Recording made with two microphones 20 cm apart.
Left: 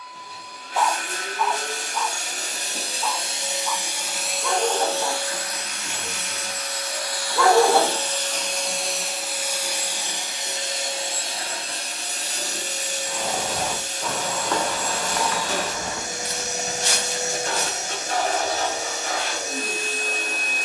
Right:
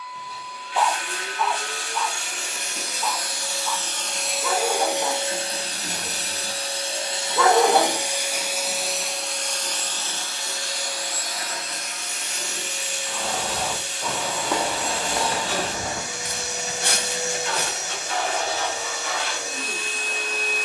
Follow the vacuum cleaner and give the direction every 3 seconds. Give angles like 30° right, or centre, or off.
40° left, 10° right, 20° right, 20° left, 40° left, 40° left, 40° left.